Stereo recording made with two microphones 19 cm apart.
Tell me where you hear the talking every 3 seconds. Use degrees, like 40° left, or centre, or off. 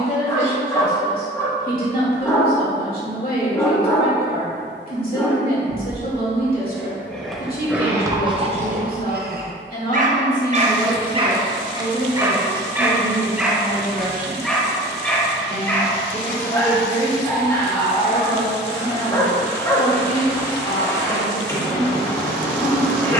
50° left, 50° left, 50° left, 10° left, 20° right, 30° left, 40° left, 40° left.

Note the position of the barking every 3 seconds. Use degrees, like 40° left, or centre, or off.
20° left, 20° left, 10° right, 40° right, centre, 10° left, 20° left, 20° left.